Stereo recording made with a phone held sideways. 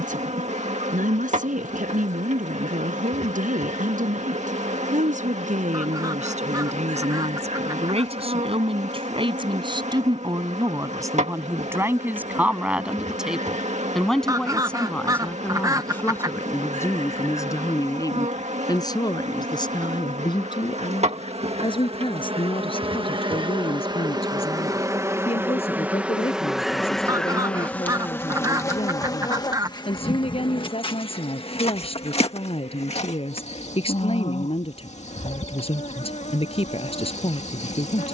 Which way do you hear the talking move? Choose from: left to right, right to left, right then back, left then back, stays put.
right to left.